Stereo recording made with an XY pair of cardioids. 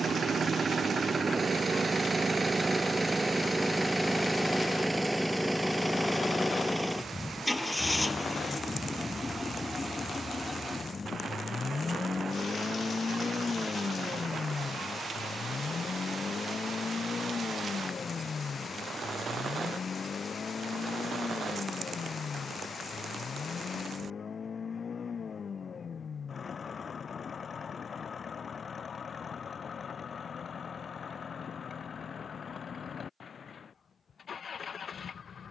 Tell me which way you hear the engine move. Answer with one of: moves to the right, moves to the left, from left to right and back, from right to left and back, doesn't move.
moves to the left.